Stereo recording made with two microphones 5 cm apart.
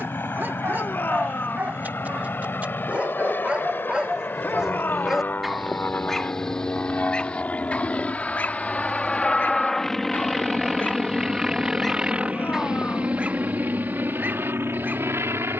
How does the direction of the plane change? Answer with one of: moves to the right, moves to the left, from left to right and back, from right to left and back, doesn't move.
moves to the right.